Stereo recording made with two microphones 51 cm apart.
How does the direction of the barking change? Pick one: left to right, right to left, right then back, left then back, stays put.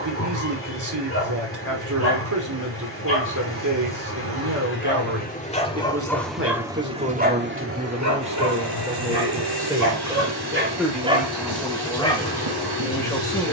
right then back.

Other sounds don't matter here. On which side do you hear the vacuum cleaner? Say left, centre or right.
right.